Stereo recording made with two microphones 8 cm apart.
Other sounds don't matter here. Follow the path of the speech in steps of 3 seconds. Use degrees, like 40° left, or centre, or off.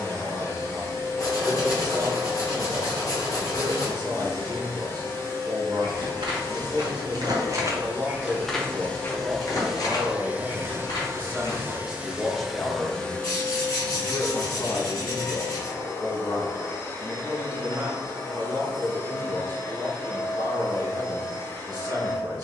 60° right, 60° right, 50° right, 30° right, 20° left, 20° left, 50° right, 50° right.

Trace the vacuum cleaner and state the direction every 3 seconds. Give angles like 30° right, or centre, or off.
30° left, 30° left, 30° left, 20° right, 20° left, 30° left, 30° left, 30° left.